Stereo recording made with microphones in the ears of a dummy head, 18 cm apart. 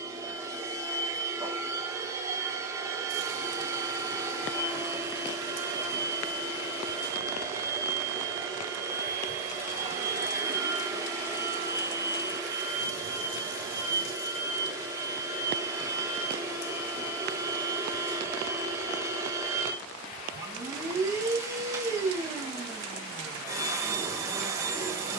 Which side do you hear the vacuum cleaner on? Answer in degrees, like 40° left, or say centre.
20° right.